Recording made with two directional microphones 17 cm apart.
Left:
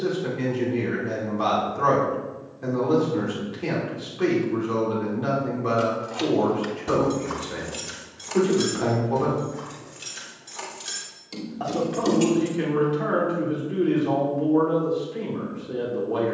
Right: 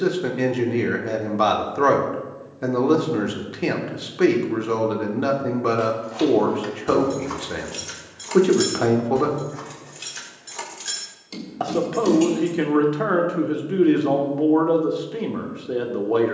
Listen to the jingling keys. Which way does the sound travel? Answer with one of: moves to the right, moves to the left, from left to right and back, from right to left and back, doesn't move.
from left to right and back.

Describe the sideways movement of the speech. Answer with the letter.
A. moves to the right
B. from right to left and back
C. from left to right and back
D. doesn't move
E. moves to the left
D.